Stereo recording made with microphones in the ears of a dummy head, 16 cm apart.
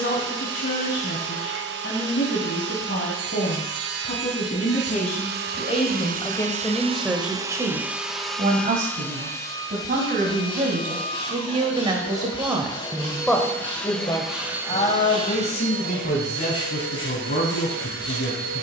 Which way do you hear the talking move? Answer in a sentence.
In this clip you hear the talking go right and come back.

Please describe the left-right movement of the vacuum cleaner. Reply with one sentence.
You can hear the vacuum cleaner move from right to left and back again.